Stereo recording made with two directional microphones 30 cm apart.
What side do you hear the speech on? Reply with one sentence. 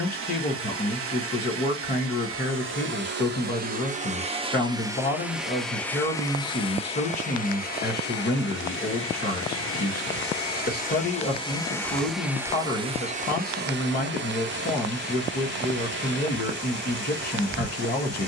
In this clip you hear the speech on the left.